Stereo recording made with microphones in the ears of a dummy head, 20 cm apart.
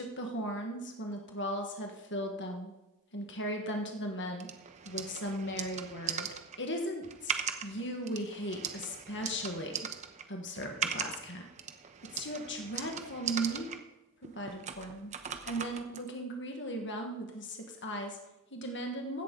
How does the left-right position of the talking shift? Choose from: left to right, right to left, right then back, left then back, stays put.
stays put.